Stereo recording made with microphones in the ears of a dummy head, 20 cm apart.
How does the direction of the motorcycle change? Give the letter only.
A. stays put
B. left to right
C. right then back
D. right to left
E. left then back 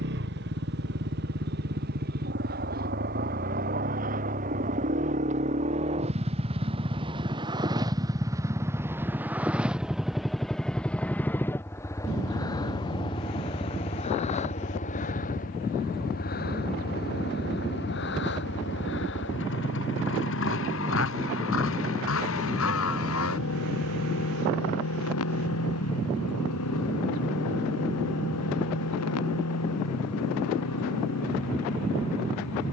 D.